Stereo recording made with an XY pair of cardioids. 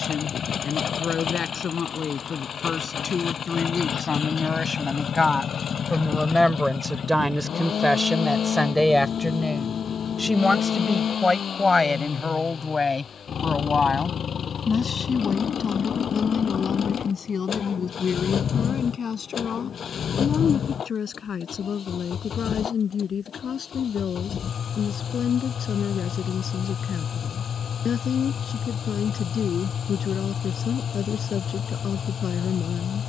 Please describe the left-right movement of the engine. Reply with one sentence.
You can hear the engine stay put.